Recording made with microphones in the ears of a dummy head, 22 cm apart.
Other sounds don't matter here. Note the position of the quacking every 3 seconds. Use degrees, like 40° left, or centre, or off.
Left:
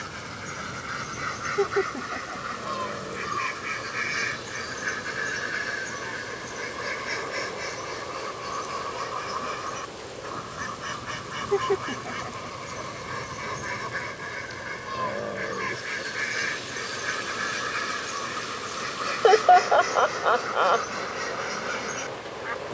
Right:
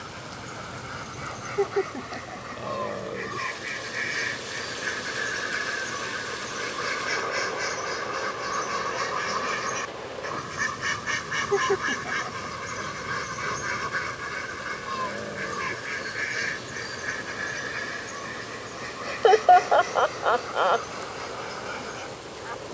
30° left, 10° left, 20° right, 30° right, 20° right, centre, 20° left, 30° left.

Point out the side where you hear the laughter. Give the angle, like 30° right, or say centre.
centre.